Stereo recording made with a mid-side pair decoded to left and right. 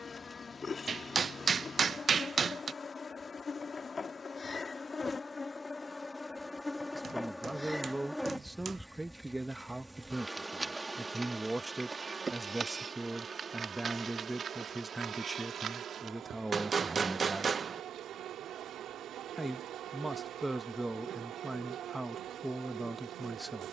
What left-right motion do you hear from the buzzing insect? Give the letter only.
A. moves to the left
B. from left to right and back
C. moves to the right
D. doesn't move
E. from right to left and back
C.